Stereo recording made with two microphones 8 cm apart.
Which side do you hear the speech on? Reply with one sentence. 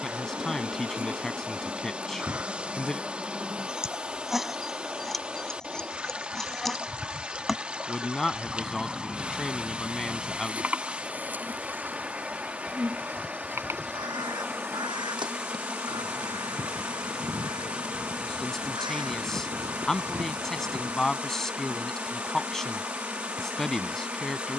In this clip you hear the speech in the centre.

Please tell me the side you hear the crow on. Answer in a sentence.
In this clip you hear the crow on the right.